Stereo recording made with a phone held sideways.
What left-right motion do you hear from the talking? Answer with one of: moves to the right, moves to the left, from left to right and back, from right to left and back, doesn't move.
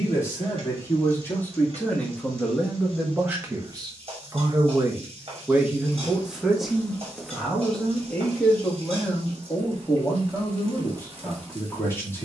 from left to right and back.